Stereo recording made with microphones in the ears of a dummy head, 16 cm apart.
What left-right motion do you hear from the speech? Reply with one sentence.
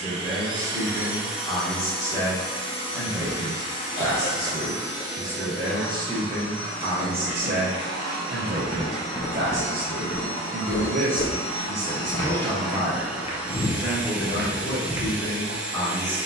In this clip you hear the speech move from left to right and back again.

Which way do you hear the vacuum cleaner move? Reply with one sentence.
You can hear the vacuum cleaner move from right to left and back again.